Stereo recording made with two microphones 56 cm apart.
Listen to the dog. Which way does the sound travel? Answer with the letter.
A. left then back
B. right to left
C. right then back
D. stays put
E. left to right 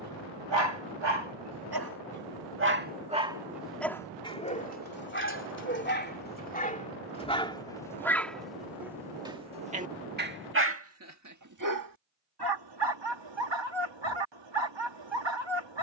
A.